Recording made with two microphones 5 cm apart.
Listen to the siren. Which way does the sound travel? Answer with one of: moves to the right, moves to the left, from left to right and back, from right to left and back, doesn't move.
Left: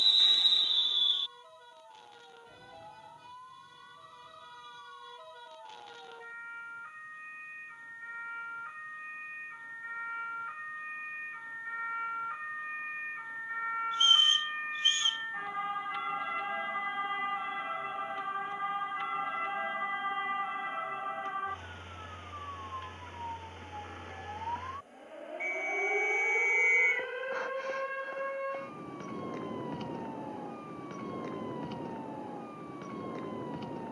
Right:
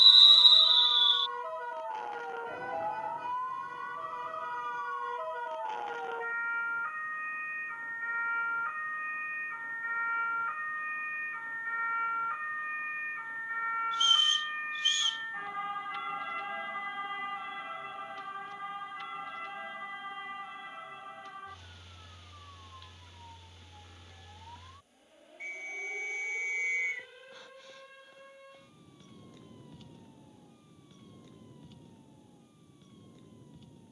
moves to the left.